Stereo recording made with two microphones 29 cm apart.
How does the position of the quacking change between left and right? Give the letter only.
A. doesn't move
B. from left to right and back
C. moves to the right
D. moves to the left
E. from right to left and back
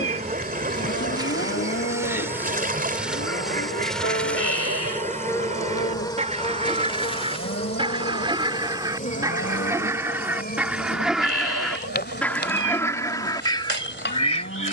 D.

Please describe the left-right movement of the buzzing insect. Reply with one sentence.
In this clip you hear the buzzing insect move from right to left.